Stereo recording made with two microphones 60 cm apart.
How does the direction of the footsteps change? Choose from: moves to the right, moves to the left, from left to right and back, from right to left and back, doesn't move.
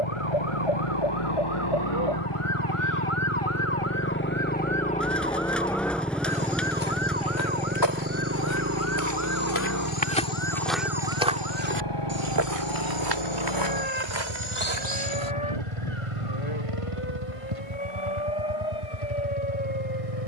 moves to the right.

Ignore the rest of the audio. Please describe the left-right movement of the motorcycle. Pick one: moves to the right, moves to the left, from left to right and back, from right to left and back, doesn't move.
moves to the right.